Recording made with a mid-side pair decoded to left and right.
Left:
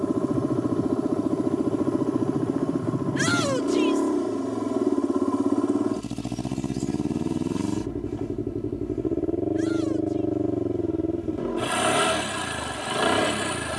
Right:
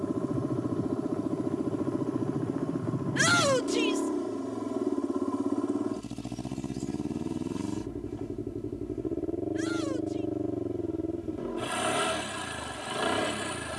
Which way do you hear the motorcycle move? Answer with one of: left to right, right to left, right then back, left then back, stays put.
stays put.